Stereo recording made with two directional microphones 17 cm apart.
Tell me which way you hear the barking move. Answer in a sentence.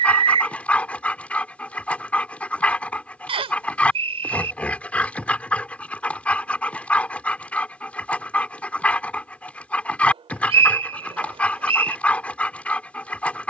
You can hear the barking stay in one place.